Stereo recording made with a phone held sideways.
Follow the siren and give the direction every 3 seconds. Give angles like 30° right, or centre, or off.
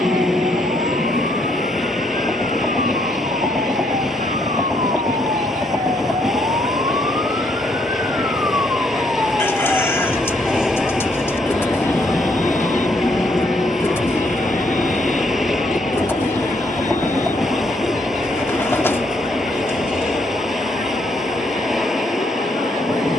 60° right, 50° right, 20° right, centre, 20° left, 40° left, 50° left, 50° left.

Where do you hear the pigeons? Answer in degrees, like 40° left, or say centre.
10° left.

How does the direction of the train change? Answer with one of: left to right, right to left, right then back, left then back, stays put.
stays put.